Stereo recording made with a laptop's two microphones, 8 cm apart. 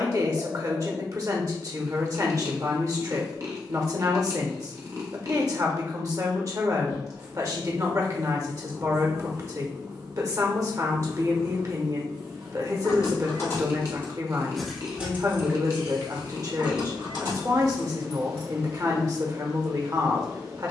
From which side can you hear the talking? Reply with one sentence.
In this clip you hear the talking on the right.